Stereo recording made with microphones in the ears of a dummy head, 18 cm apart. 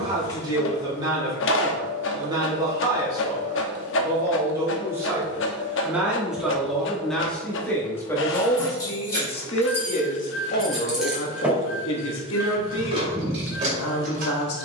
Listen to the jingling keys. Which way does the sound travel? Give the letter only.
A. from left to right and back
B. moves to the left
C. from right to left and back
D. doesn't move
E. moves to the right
E.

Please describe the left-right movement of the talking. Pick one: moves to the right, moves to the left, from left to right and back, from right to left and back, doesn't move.
moves to the left.